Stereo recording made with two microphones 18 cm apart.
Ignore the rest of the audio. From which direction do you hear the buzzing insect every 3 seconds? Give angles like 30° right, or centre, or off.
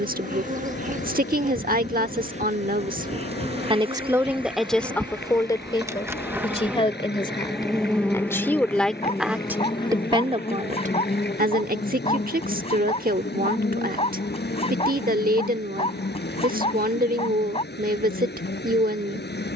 40° right, 30° right, centre, 30° left, 60° left, 70° left, 70° left.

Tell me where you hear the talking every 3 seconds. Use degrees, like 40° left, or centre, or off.
50° right, centre, 20° left, 30° right, 50° right, 50° right, 50° right.